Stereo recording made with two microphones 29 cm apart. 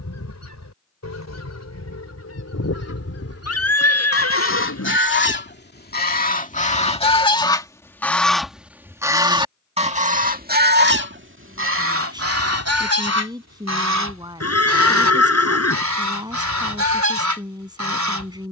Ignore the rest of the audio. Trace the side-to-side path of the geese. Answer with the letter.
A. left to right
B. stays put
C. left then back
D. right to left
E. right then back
A.